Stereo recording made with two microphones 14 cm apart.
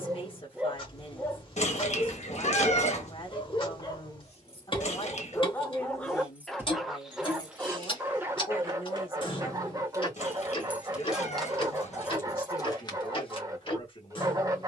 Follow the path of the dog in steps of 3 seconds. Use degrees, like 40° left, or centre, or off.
10° left, 20° left, 10° right, 20° right, 20° right.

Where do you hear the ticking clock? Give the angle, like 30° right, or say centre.
40° left.